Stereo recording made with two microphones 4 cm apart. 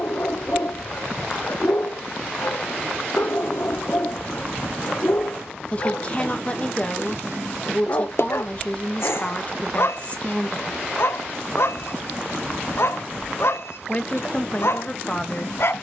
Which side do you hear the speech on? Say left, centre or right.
left.